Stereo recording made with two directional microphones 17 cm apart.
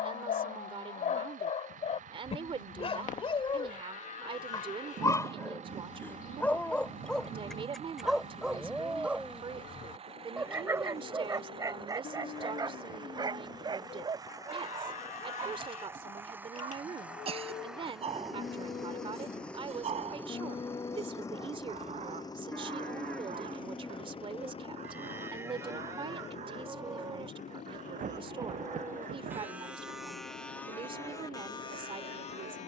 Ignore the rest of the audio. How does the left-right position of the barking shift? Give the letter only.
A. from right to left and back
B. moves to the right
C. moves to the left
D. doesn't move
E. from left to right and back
B.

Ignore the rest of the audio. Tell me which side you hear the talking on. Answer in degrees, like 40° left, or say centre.
30° right.